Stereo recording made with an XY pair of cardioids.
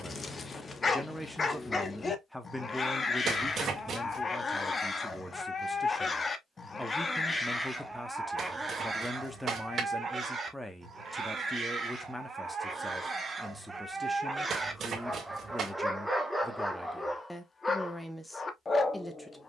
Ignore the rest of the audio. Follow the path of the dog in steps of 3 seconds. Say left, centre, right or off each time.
left, left, centre, right, right, centre, left.